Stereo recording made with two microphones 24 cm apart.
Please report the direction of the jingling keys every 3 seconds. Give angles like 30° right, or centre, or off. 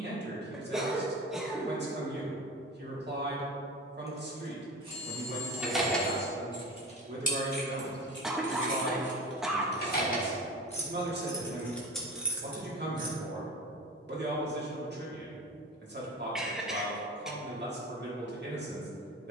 off, 10° right, 40° left, 30° left, 10° right, off, off.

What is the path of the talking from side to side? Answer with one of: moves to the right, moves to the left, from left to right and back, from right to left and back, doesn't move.
doesn't move.